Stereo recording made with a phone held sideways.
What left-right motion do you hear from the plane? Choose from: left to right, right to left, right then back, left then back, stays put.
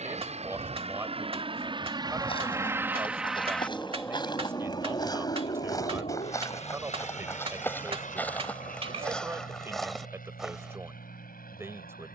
right to left.